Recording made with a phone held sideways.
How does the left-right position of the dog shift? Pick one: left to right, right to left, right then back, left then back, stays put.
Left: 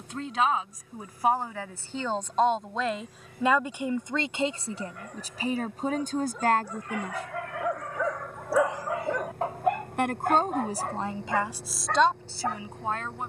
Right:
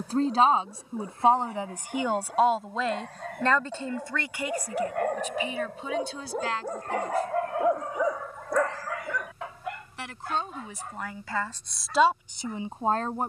right to left.